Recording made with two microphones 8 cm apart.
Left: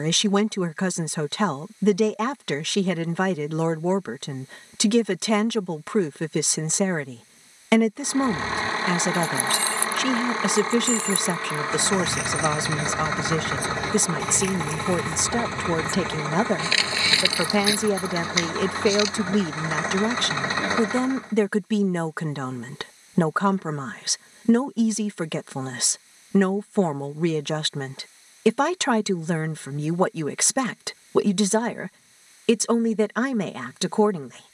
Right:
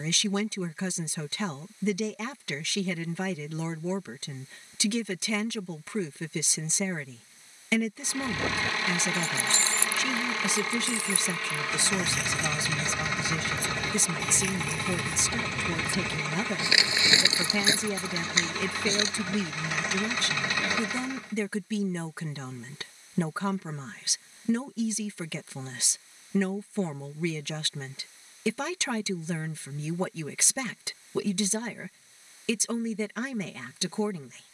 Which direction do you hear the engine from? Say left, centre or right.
left.